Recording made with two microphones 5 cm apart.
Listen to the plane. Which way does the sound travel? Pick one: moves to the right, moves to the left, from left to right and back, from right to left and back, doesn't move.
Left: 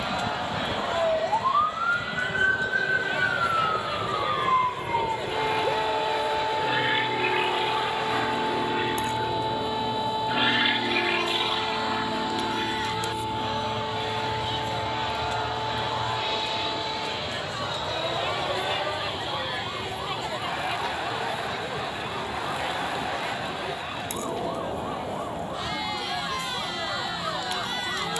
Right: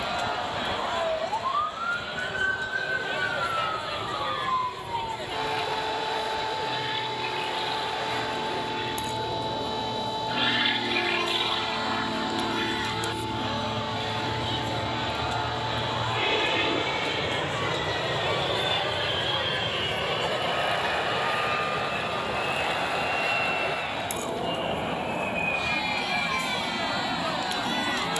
moves to the right.